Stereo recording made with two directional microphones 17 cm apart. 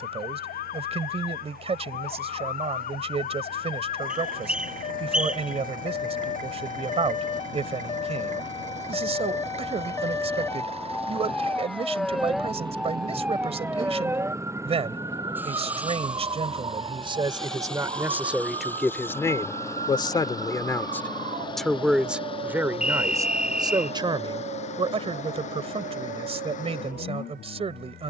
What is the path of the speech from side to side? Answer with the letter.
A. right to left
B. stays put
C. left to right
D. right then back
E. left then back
E.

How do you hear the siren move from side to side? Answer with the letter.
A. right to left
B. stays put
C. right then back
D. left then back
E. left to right
E.